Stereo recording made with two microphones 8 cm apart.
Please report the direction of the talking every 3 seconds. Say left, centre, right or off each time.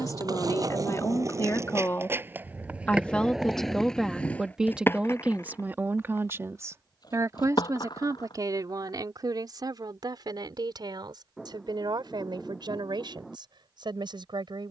left, centre, right, right, right.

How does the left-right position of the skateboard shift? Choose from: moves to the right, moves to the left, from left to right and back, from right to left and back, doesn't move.
moves to the left.